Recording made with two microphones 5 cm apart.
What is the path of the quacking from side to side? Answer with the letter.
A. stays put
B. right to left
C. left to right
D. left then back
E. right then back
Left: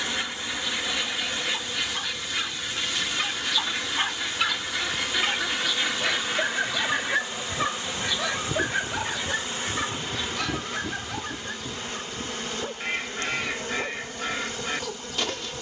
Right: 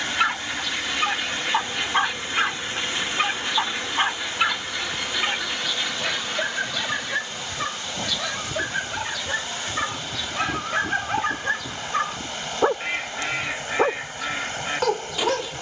D.